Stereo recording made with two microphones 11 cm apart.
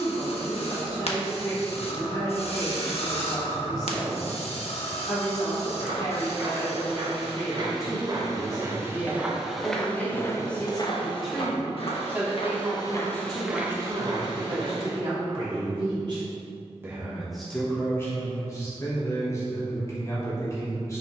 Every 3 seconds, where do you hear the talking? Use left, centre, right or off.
left, left, left, centre, right, right, left.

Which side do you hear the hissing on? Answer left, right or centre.
left.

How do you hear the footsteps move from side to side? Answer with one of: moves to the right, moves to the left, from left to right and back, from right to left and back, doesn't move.
from right to left and back.